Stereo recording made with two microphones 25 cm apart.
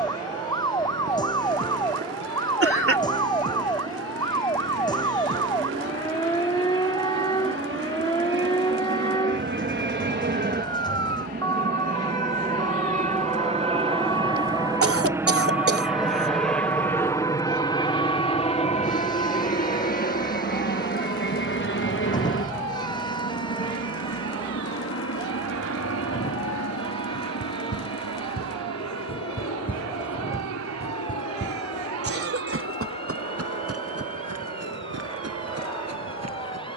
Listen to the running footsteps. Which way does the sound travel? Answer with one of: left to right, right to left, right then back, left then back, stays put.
left to right.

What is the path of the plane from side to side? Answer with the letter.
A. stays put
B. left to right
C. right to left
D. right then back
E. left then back
C.